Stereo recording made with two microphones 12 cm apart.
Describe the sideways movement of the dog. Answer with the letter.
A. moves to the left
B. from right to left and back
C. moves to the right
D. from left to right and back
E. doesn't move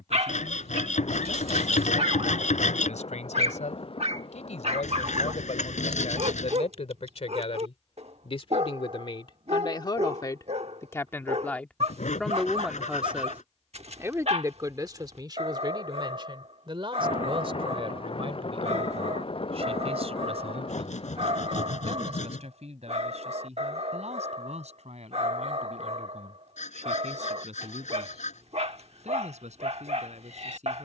E.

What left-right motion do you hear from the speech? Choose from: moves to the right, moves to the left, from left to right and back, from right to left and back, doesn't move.
moves to the right.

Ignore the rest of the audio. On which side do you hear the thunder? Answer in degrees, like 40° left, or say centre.
50° left.